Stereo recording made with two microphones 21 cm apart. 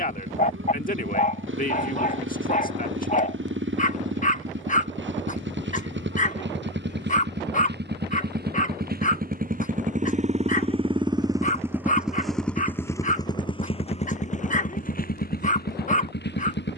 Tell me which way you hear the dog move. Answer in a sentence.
You can hear the dog stay in one place.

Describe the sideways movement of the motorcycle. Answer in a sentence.
You can hear the motorcycle move to the left.